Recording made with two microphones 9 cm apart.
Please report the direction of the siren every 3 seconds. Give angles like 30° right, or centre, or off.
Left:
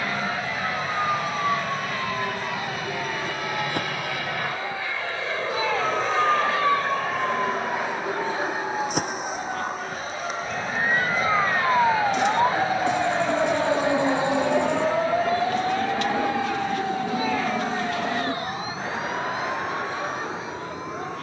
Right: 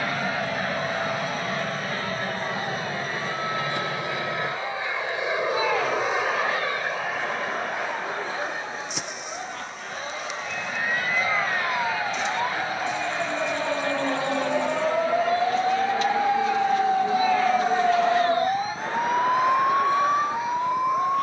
60° left, 60° left, 50° left, 40° left, 20° left, 20° right, 50° right.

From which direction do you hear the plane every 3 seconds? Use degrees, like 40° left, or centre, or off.
40° right, 20° right, centre, 20° left, 30° left, 40° left, 50° left.